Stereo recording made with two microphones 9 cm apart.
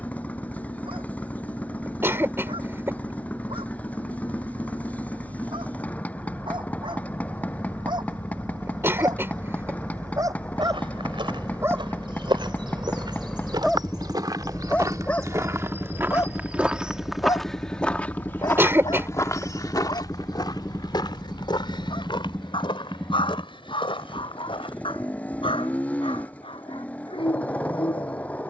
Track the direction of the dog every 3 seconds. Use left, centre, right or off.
right, right, right, right, centre, left, left, left, left, left.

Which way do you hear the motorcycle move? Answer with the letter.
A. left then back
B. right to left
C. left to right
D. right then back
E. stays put
E.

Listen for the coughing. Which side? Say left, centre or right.
right.